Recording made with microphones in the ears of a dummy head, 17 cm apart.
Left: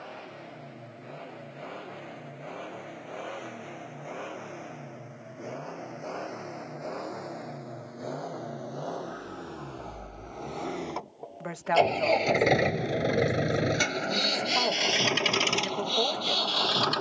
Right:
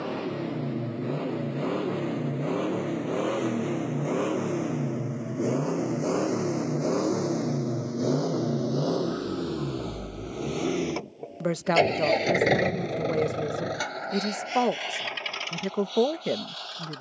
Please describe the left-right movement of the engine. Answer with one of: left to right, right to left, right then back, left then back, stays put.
right to left.